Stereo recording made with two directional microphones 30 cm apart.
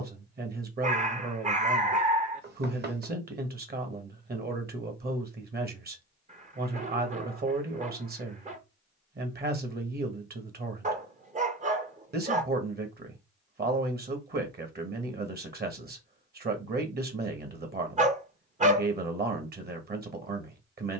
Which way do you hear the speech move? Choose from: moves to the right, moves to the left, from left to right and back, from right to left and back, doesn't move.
doesn't move.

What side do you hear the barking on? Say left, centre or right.
right.